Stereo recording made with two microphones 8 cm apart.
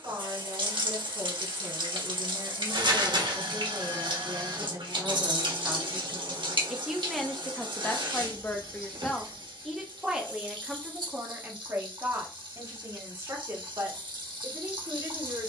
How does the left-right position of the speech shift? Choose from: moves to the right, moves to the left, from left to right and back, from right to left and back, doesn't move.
from right to left and back.